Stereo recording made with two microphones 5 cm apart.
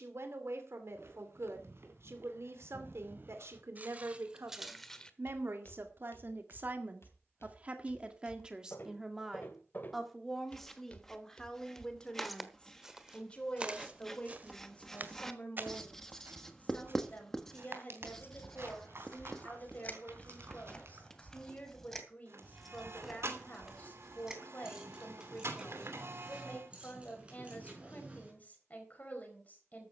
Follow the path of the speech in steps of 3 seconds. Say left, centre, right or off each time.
right, right, right, centre, left, left, left, left, left, left.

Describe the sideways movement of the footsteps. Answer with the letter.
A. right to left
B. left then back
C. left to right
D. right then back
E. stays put
B.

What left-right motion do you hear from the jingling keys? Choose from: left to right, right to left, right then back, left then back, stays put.
left to right.